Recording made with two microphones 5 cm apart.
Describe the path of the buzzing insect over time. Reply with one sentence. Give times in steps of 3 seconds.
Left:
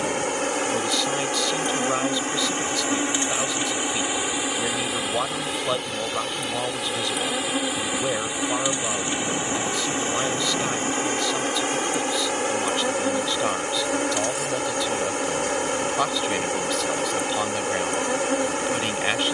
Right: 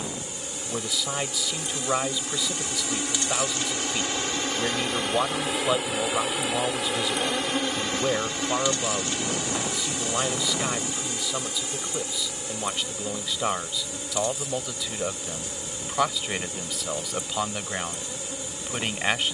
In this clip you hear the buzzing insect on the left from 0 s, in the centre from 3 s and on the left from 9 s.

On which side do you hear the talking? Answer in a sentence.
In this clip you hear the talking in the centre.